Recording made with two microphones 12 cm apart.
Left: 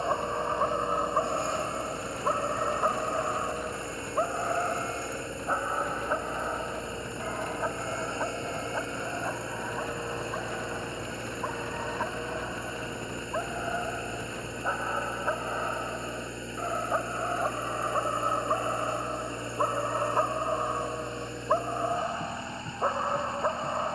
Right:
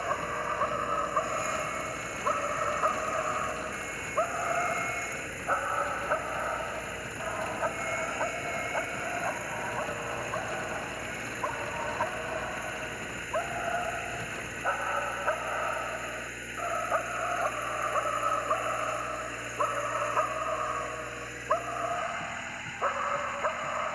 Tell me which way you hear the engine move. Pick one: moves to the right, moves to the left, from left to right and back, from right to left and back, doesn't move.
doesn't move.